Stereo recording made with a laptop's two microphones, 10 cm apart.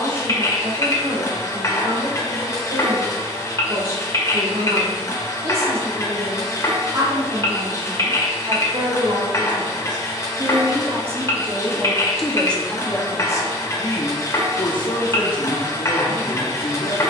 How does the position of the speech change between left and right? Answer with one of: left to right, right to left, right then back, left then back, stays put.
right to left.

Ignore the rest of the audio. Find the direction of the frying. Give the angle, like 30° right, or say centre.
30° left.